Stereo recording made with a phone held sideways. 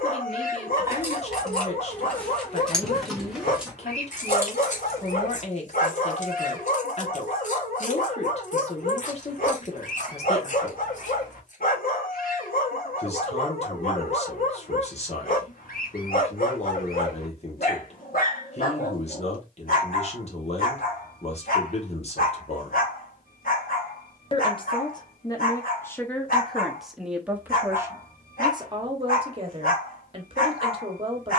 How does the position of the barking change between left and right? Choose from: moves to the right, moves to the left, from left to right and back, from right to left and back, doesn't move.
doesn't move.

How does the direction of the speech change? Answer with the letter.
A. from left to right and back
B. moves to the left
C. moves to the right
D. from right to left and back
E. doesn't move
C.